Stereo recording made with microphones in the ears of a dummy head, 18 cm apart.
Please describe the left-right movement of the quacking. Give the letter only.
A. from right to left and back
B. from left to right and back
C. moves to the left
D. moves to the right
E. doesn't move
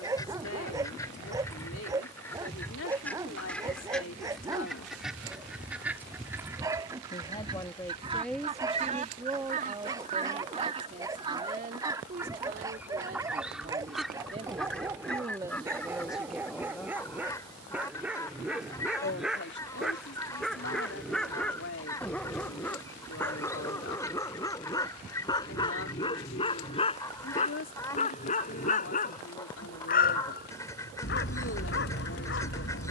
B.